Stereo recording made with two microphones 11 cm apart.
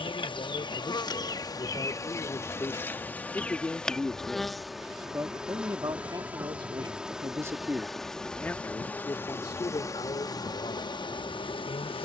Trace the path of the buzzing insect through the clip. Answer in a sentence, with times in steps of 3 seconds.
You can hear the buzzing insect on the left from 0 s, in the centre from 3 s and on the left from 9 s.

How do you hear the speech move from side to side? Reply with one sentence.
In this clip you hear the speech go right and come back.